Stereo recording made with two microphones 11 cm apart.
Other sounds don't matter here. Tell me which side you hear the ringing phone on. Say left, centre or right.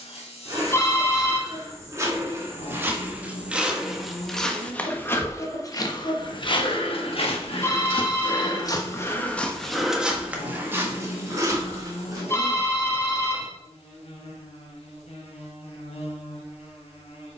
left.